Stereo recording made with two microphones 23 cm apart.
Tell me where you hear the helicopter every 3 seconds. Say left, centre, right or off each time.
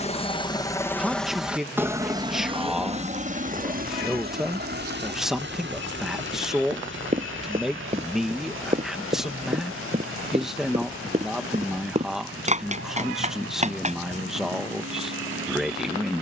centre, right, right, right, right, right.